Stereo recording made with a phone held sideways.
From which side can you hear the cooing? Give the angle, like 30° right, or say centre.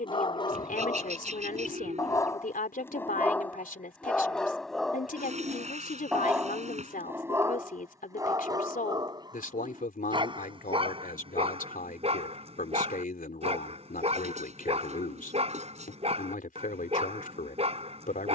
50° right.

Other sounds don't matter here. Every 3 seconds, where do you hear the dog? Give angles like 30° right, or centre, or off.
20° left, centre, 20° right, 30° right, 40° right, 40° right.